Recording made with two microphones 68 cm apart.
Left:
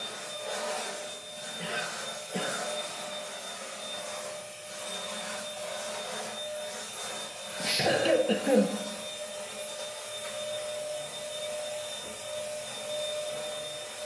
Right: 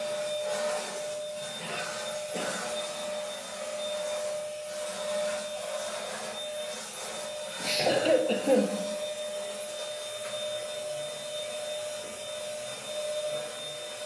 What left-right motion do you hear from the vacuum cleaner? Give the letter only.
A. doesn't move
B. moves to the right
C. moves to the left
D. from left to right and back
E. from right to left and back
C.